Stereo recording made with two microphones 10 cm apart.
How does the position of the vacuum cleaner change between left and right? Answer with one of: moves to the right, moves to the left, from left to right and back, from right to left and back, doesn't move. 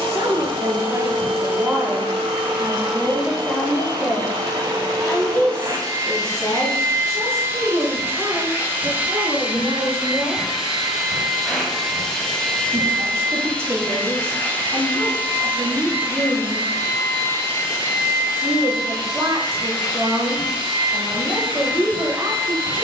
moves to the left.